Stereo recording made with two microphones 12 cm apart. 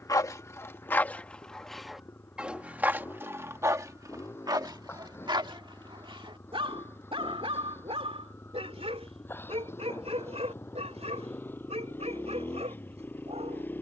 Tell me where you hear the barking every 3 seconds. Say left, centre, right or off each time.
centre, right, right, right, right.